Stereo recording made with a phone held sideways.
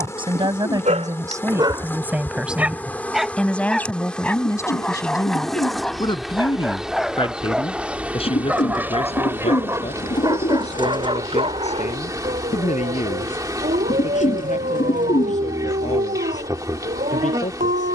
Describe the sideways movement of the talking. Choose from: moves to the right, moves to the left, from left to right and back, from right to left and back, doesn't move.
moves to the left.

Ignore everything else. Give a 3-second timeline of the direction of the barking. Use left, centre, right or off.
right, centre, centre, right, right, right.